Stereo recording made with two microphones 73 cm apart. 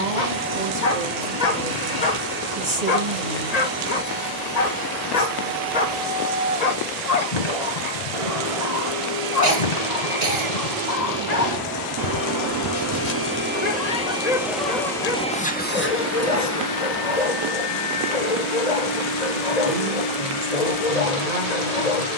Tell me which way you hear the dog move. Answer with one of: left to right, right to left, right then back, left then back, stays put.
stays put.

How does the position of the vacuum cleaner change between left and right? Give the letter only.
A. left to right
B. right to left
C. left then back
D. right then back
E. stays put
B.